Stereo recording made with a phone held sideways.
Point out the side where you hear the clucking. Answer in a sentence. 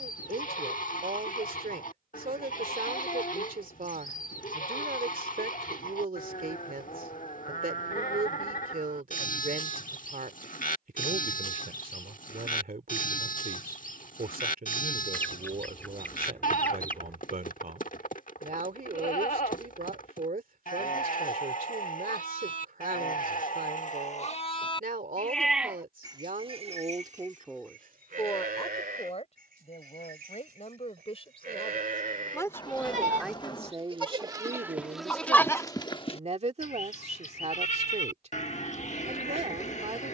You can hear the clucking in the centre.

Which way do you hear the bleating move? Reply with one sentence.
In this clip you hear the bleating move from left to right and back again.